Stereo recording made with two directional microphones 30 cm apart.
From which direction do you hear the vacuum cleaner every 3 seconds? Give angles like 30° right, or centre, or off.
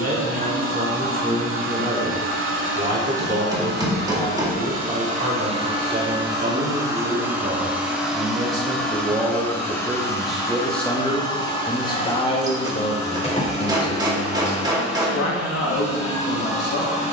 40° right, 30° right, 10° right, 10° left, 20° left, 30° left.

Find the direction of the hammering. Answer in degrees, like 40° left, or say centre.
10° right.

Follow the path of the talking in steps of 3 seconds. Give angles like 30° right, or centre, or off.
30° right, 30° right, 20° right, centre, 30° left, 60° left.